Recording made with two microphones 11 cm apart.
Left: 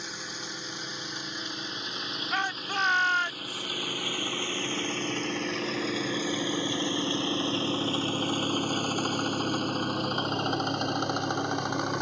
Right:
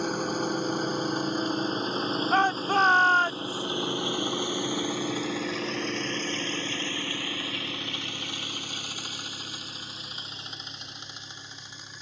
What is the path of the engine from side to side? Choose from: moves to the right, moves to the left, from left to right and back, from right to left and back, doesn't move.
moves to the left.